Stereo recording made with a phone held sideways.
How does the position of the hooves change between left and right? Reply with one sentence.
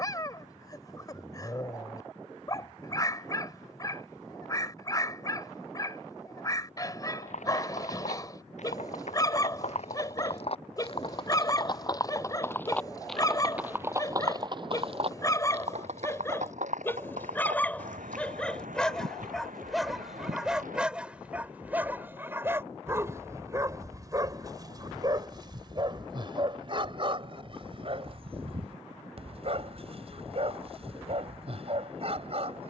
In this clip you hear the hooves go from the left side to the right.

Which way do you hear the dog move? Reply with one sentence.
In this clip you hear the dog travel towards the right.